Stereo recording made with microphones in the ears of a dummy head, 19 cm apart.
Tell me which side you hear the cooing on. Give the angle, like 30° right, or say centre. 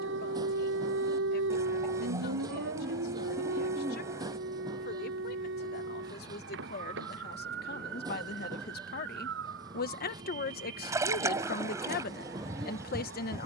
20° right.